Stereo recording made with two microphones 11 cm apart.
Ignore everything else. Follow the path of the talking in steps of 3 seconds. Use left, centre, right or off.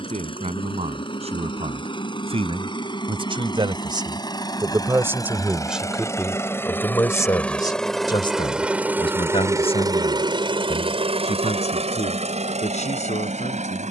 right, right, left, left, left.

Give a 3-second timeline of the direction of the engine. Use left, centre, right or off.
left, left, centre, right, right.